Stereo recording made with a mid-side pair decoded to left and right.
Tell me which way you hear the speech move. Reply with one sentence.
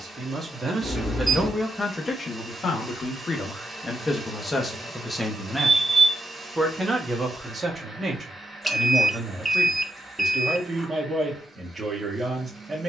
You can hear the speech move from right to left and back again.